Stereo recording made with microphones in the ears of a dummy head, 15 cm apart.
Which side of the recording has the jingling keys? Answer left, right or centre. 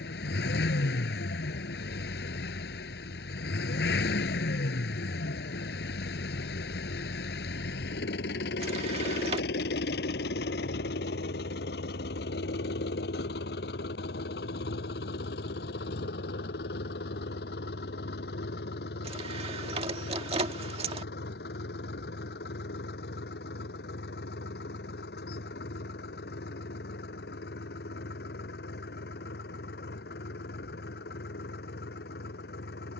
right.